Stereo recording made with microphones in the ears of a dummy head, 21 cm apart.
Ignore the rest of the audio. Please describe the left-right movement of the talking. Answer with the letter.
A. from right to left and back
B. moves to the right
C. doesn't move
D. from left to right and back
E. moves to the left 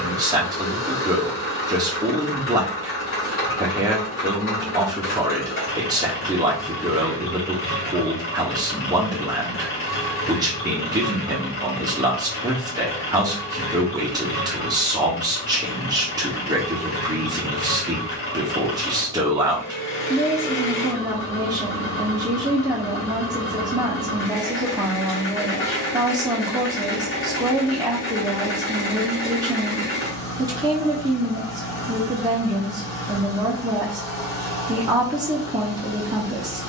C.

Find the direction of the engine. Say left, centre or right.
left.